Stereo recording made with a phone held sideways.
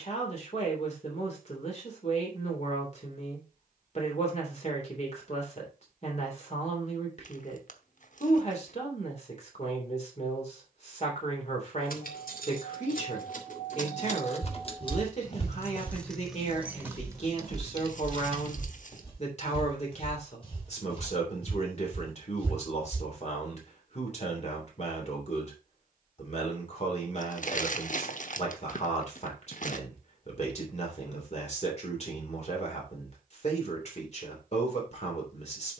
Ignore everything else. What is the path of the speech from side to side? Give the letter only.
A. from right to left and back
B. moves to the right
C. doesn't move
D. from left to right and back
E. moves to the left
C.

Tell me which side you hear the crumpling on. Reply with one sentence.
In this clip you hear the crumpling on the left.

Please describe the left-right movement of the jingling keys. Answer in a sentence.
You can hear the jingling keys move to the right.